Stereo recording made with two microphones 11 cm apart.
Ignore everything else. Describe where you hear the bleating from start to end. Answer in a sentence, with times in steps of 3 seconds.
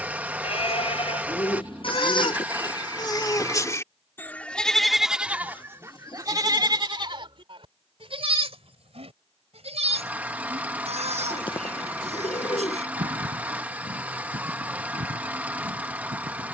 You can hear the bleating on the left from 0 s, in the centre from 3 s and on the right from 6 s.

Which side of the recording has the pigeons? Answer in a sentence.
In this clip you hear the pigeons on the left.